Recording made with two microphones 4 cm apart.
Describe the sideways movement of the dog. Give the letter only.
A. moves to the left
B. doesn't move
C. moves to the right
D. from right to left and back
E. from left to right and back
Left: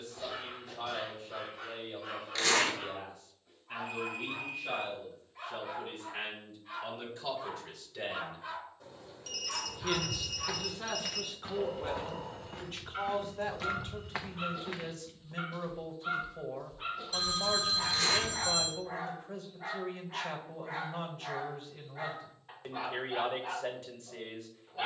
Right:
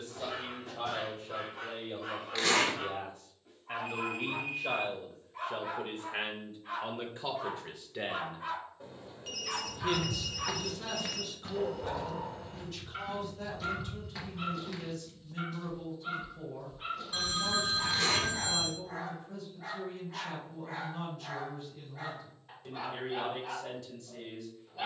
A.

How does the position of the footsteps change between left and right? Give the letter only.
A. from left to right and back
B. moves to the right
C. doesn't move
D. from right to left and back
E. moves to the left
D.